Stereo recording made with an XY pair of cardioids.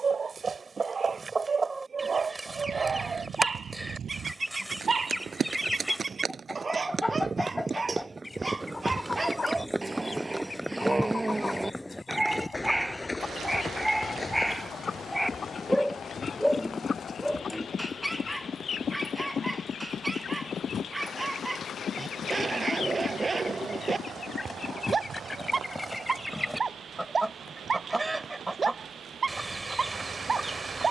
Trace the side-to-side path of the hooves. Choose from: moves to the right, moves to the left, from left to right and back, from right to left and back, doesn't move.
moves to the left.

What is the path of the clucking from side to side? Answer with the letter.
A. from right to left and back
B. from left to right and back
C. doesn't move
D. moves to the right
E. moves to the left
A.